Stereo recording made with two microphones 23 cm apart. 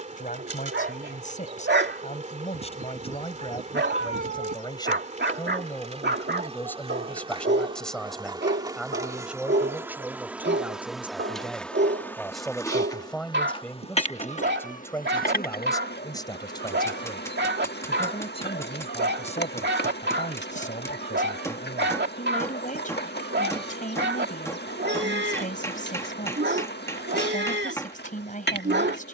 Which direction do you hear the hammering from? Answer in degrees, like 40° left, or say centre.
10° left.